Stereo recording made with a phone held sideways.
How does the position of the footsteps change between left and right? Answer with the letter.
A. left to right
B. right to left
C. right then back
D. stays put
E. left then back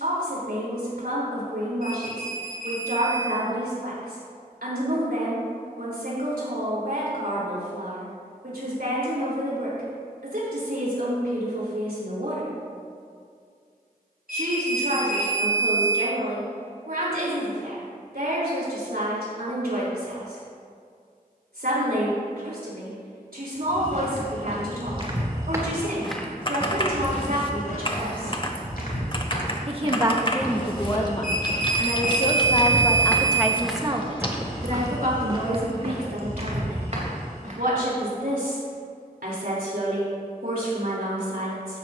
E.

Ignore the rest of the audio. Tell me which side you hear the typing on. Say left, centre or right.
left.